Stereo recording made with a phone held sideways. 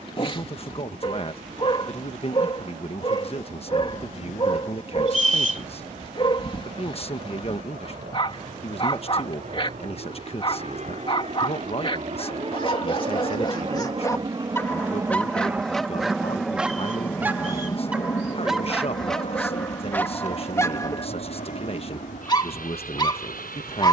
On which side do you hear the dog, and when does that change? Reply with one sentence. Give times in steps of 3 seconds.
You can hear the dog on the left from 0 s, in the centre from 15 s and on the left from 21 s.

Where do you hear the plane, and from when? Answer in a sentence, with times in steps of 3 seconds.
You can hear the plane on the right from 0 s, in the centre from 15 s and on the left from 18 s.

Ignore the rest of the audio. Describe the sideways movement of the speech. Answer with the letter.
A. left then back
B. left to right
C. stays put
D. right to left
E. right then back
C.